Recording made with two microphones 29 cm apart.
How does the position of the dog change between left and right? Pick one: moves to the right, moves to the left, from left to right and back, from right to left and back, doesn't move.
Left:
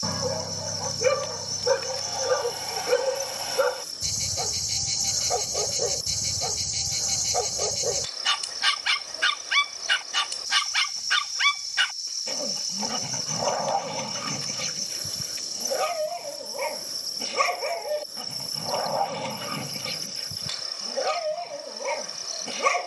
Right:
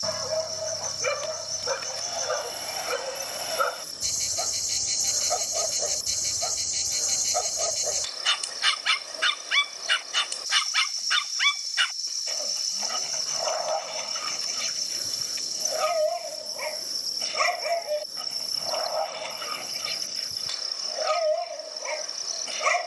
doesn't move.